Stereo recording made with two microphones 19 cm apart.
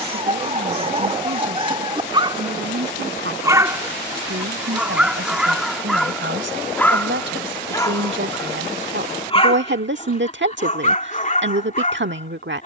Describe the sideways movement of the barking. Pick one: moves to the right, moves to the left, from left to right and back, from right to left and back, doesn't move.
moves to the left.